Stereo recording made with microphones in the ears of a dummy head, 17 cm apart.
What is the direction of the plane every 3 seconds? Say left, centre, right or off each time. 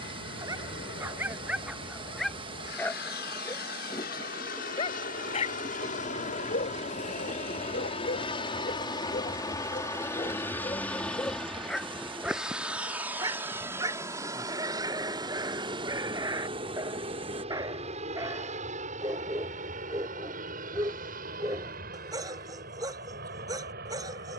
left, left, left, centre, centre, right, right, right.